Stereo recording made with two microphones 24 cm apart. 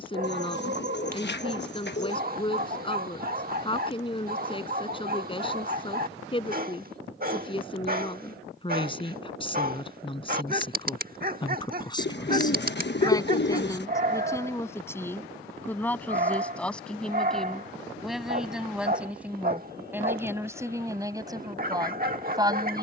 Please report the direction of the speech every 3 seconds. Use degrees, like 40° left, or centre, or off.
20° left, 20° left, 20° left, 20° left, 10° left, 10° left, 10° right, 20° right.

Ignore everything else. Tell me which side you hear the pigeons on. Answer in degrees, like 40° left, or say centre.
50° left.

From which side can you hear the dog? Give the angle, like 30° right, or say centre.
40° right.